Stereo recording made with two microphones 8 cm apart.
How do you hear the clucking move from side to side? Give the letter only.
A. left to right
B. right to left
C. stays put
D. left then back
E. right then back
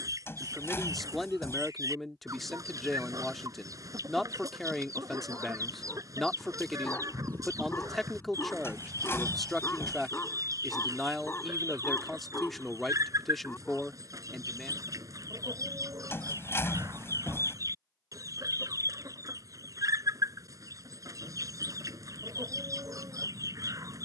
C.